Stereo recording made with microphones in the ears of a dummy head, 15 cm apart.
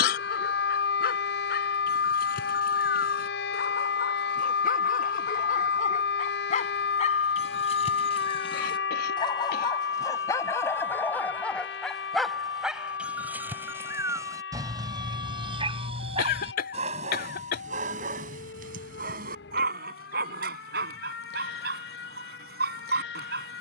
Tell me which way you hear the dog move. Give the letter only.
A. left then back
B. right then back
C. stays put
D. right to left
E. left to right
E.